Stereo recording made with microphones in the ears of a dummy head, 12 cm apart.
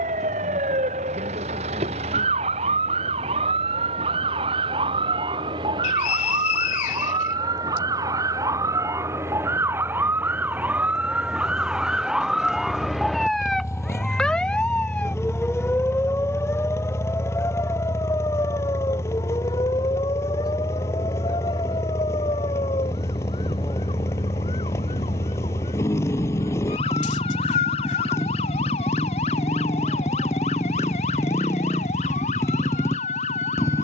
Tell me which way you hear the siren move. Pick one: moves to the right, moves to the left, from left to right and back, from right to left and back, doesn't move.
moves to the left.